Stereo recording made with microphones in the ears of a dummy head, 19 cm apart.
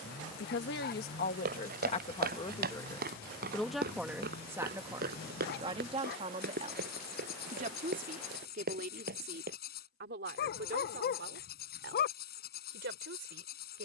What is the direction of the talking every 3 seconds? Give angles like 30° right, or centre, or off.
30° left, 10° right, 40° right, 50° right, 50° right.